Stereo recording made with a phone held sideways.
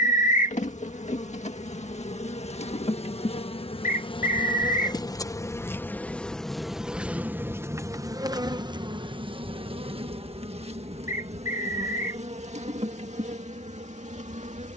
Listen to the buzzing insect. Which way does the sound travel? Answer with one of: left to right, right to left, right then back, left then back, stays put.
left to right.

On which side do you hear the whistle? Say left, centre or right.
left.